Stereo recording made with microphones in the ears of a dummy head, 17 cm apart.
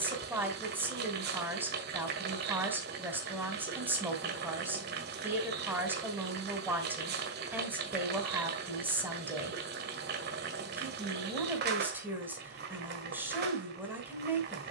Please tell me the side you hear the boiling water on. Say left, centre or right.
right.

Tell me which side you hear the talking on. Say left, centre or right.
centre.